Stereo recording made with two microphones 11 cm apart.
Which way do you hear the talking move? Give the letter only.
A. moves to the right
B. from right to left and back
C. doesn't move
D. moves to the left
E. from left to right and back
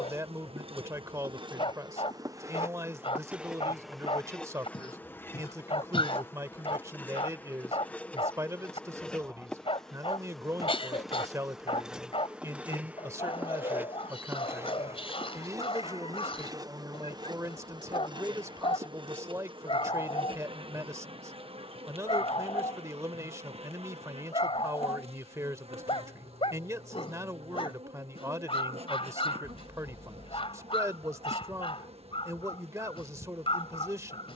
C.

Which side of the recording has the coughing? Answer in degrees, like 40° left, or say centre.
60° left.